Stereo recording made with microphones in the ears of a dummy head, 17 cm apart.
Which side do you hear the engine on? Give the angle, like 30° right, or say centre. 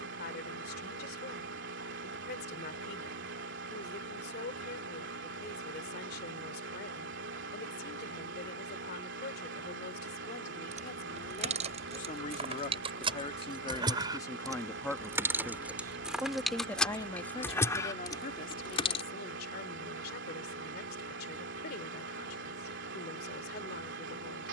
70° right.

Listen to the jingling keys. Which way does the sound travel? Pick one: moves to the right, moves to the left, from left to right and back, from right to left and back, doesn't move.
moves to the left.